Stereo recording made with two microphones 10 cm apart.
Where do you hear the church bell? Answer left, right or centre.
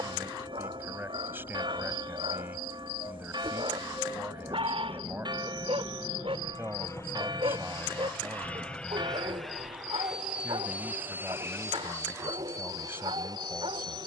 right.